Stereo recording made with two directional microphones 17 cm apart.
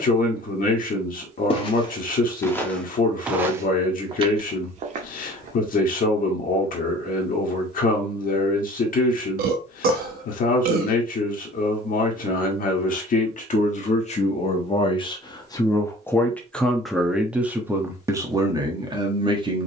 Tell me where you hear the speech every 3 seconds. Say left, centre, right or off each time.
left, left, left, left, left, centre, right.